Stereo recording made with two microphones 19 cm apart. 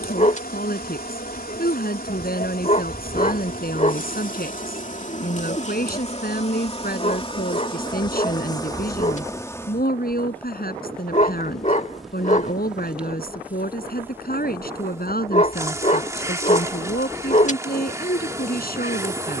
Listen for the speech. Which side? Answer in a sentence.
You can hear the speech on the left.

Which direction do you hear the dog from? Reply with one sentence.
You can hear the dog on the left.